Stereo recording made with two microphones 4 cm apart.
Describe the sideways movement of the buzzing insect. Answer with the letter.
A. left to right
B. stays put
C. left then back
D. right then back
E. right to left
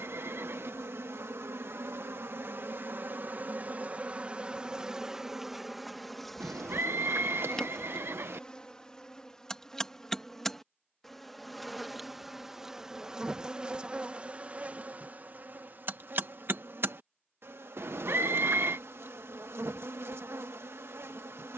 C.